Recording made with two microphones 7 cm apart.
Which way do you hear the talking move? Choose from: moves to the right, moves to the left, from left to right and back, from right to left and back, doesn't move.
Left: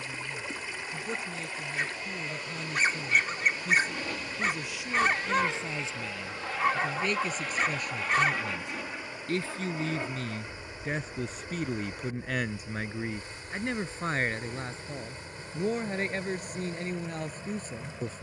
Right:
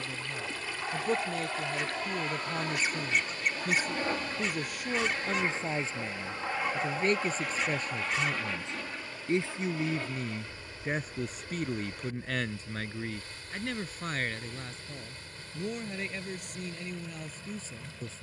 moves to the left.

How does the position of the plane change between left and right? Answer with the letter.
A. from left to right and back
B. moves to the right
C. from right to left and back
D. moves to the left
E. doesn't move
D.